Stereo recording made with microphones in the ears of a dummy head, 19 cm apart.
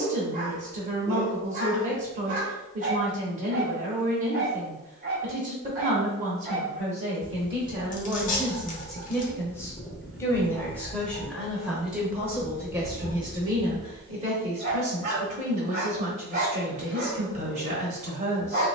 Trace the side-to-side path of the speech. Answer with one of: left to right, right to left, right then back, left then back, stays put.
left then back.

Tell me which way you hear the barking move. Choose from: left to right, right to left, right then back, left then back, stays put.
left then back.